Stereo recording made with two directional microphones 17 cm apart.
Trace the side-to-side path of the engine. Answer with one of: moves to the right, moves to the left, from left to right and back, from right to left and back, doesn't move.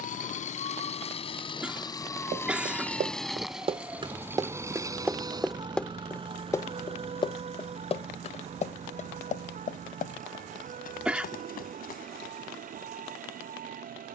moves to the right.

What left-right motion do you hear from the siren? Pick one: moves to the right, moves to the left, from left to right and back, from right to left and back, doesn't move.
moves to the right.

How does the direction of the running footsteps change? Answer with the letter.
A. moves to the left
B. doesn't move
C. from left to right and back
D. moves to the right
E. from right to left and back
A.